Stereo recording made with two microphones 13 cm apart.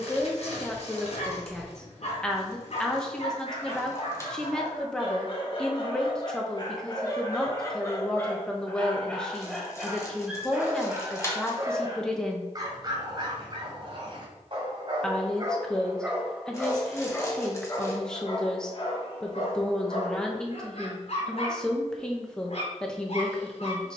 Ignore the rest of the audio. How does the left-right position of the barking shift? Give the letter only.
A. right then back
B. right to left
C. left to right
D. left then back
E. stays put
A.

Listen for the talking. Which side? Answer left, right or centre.
centre.